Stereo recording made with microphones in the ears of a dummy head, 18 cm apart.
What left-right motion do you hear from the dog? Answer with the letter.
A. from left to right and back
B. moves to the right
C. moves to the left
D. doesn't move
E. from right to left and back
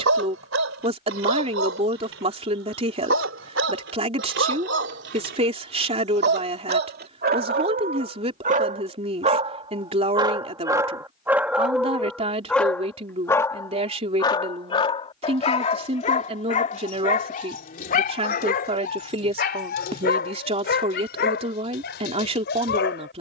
C.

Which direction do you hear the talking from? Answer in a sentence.
In this clip you hear the talking on the right.